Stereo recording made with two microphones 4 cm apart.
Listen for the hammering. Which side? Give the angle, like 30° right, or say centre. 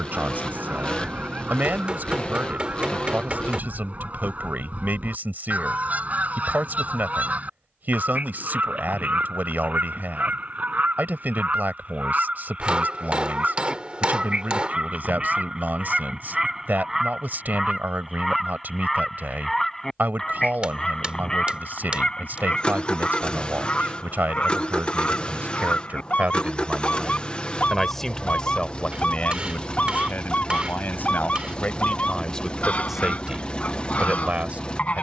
20° right.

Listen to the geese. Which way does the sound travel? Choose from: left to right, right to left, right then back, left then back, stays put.
right to left.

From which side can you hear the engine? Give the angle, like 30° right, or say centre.
20° left.